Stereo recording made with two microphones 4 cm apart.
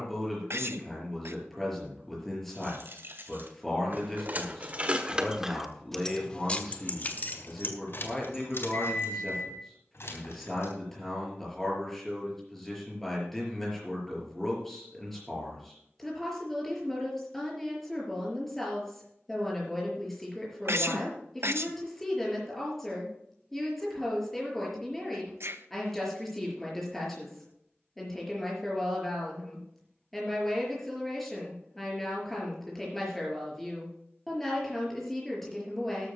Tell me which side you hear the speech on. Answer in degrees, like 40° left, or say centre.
10° left.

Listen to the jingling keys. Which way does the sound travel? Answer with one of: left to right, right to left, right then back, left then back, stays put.
right to left.